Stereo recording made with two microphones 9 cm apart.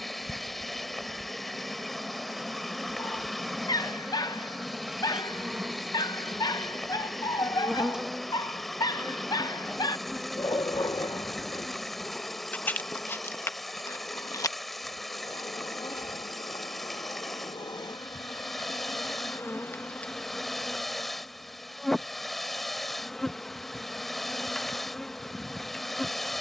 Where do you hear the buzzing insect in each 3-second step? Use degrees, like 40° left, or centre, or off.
10° right, 10° right, 10° right, centre, 30° left, 50° left, 20° left, centre, centre.